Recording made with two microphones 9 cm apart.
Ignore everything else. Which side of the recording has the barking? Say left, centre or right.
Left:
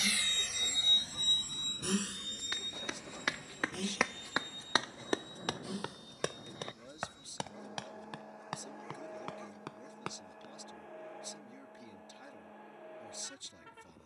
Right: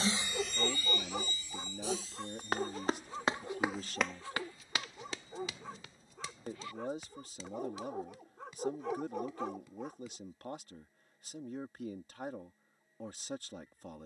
right.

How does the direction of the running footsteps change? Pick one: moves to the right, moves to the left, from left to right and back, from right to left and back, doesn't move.
moves to the left.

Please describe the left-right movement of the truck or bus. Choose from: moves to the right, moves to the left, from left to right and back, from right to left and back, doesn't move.
moves to the left.